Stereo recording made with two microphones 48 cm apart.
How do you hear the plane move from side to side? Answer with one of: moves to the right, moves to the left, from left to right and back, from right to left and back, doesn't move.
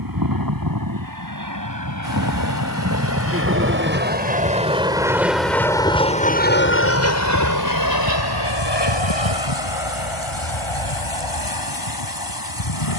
moves to the left.